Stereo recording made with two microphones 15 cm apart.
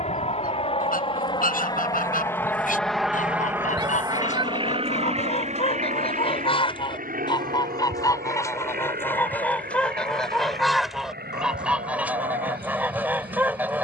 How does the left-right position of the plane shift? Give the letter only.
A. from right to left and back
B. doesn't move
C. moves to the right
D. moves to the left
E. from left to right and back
C.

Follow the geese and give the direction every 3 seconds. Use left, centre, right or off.
left, left, left, centre, centre.